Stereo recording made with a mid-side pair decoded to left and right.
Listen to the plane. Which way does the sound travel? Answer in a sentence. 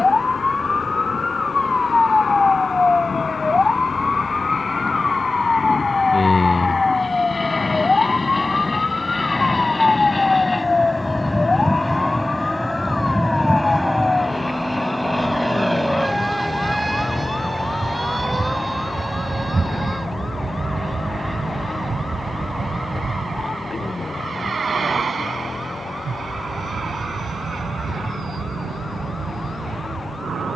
In this clip you hear the plane move from left to right.